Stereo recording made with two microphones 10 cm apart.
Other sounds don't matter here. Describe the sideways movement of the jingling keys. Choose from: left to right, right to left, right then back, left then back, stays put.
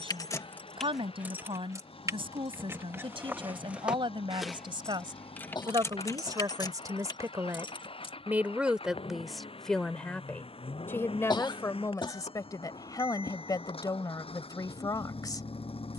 right then back.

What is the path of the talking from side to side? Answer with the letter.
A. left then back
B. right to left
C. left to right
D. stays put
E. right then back
B.